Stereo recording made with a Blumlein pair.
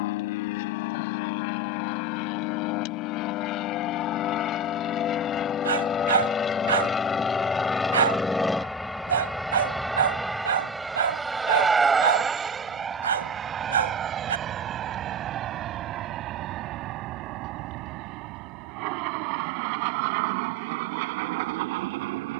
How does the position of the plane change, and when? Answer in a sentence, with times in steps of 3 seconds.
You can hear the plane on the left from 0 s, in the centre from 6 s and on the right from 12 s.